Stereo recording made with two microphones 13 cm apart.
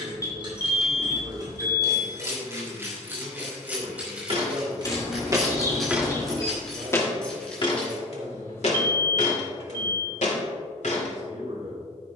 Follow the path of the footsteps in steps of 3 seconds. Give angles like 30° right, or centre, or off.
off, 40° right, 30° left, 70° left.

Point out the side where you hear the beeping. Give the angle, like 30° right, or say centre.
30° left.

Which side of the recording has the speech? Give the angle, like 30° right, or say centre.
50° right.